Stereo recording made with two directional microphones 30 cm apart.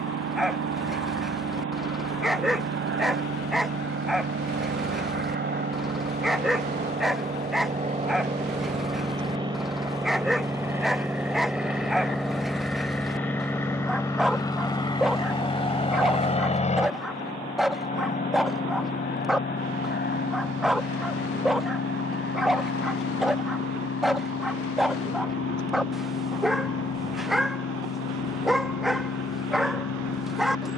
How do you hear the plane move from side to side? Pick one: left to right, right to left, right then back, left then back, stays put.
right to left.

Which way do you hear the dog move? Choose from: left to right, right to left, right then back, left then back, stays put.
stays put.